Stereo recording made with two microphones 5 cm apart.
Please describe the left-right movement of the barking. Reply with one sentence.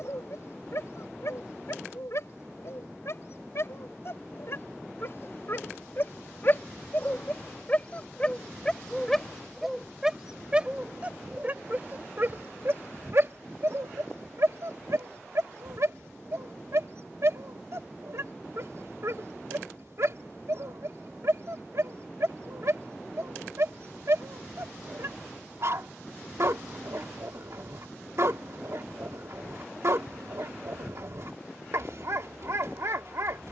In this clip you hear the barking go from the left side to the right.